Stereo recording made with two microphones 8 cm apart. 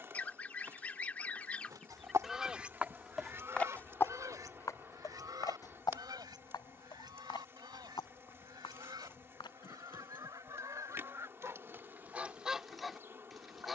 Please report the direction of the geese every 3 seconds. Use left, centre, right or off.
centre, right, right, right, centre.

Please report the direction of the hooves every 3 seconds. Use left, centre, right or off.
right, left, left, left, off.